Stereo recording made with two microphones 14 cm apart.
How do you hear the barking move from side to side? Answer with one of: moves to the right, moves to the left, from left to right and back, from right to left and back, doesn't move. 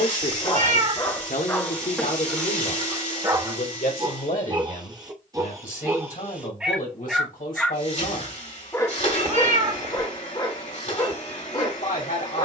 from left to right and back.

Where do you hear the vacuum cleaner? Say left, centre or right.
left.